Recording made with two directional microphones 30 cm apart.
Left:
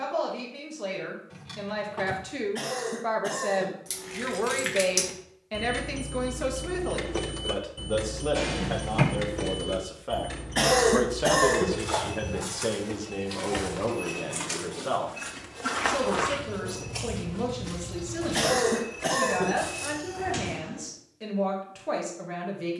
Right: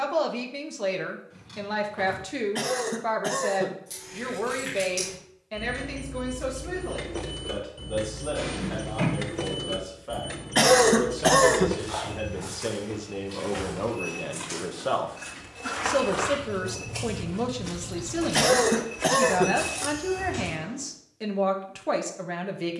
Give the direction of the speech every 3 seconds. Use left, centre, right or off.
right, centre, left, left, centre, right, right, right.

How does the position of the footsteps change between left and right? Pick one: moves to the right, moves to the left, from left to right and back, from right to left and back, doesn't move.
moves to the right.